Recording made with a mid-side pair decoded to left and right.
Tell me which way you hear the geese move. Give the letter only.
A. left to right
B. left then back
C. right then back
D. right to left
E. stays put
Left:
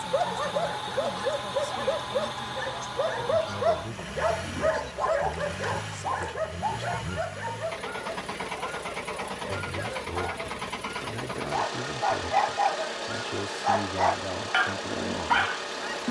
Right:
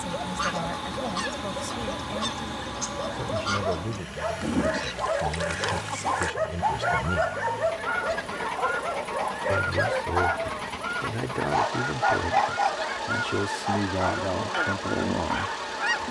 E.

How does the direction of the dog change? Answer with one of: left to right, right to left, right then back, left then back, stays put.
right then back.